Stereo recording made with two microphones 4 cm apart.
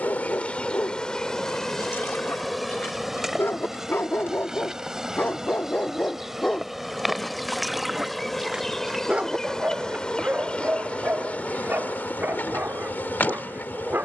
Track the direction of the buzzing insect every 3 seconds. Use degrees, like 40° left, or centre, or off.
10° left, 10° right, centre, 20° left, 40° left.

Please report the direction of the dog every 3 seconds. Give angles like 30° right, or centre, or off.
70° left, 50° left, 10° left, 40° right, 50° right.